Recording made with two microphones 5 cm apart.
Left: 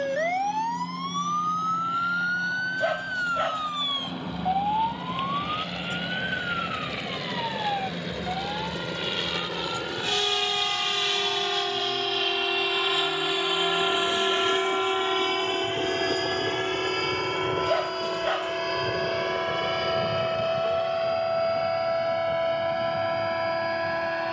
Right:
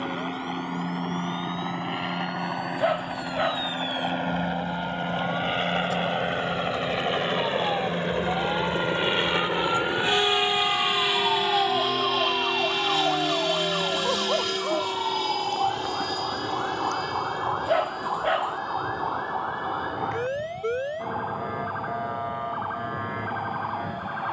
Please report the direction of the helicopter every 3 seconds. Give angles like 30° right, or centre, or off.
60° right, 50° right, 40° right, 20° right, 10° left, 50° left, 60° left, 70° left.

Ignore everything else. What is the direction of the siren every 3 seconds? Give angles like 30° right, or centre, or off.
60° left, 50° left, 10° left, 40° right, 60° right, 70° right, 80° right, 80° right.